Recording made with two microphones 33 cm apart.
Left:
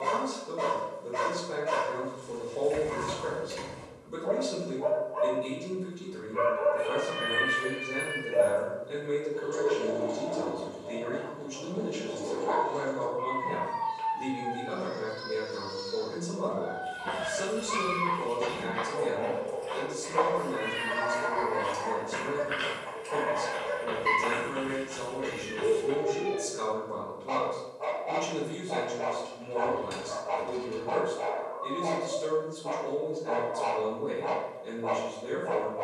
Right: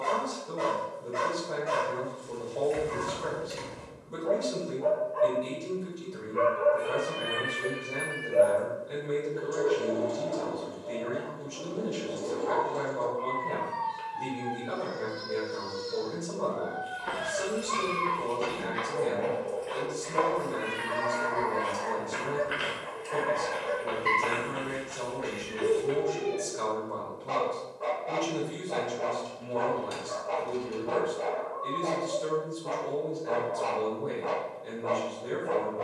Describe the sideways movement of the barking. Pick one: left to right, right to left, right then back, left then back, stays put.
stays put.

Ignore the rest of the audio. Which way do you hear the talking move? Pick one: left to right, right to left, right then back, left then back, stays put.
stays put.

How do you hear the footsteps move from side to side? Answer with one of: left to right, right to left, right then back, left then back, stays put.
right then back.